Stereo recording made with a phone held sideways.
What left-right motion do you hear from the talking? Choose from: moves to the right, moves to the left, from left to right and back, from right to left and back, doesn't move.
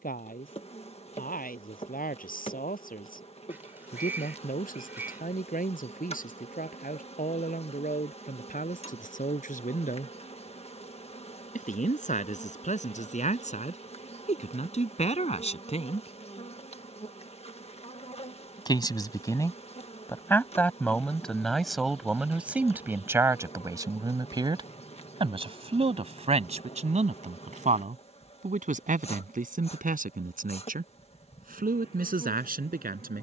moves to the right.